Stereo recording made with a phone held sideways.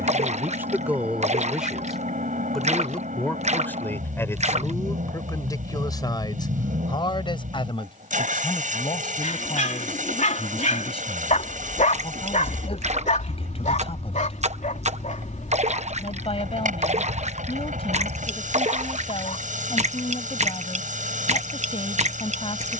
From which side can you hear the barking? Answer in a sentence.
In this clip you hear the barking on the left.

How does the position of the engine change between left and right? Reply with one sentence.
You can hear the engine stay put.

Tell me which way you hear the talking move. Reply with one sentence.
You can hear the talking move from right to left.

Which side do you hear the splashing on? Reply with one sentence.
You can hear the splashing on the right.